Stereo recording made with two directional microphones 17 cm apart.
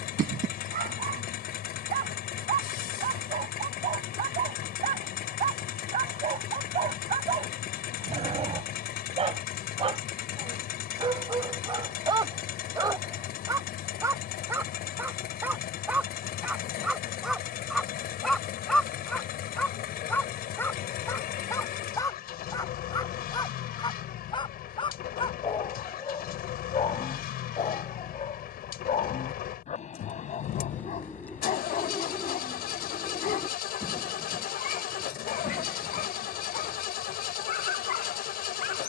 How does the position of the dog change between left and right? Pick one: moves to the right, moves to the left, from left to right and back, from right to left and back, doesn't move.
moves to the left.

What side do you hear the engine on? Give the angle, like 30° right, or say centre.
60° left.